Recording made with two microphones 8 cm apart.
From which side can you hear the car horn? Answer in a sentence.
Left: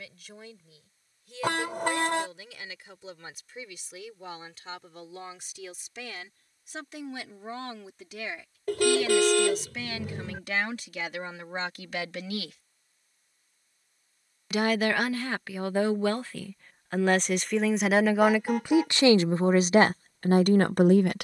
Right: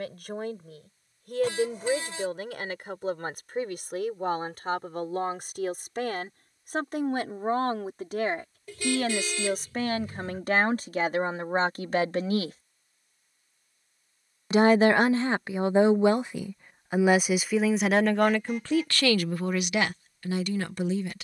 You can hear the car horn on the left.